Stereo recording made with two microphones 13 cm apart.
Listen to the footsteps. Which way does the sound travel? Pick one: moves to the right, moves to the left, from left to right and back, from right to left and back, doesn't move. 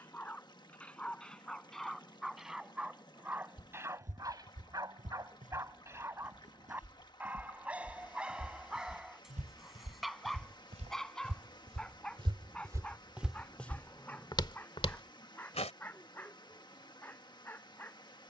moves to the left.